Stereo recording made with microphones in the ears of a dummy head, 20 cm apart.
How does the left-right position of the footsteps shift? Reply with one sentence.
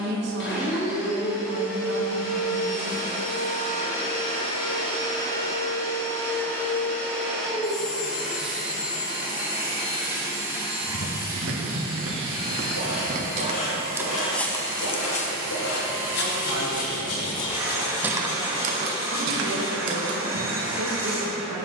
In this clip you hear the footsteps move from right to left and back again.